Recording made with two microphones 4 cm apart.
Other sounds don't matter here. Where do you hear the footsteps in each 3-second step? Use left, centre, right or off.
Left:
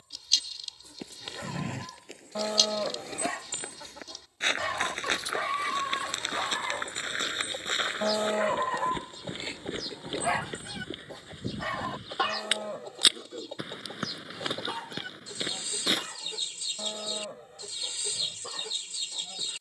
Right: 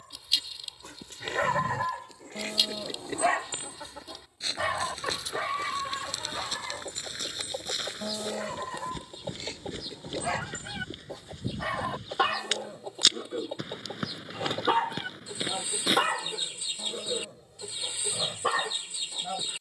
left, left, left, left, centre, centre, off.